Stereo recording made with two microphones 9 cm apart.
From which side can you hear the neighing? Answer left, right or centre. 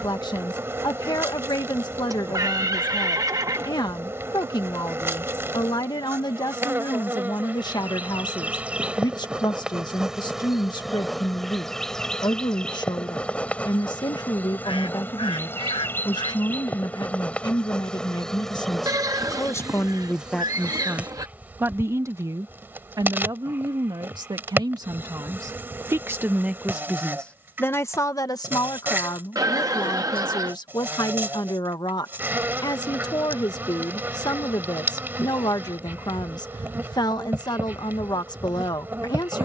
right.